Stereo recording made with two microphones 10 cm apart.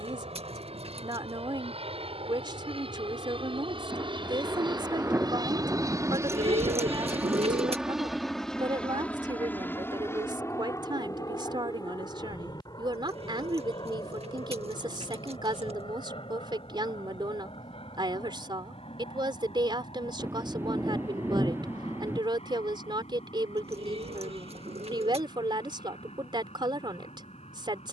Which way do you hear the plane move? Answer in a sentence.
In this clip you hear the plane move to the left.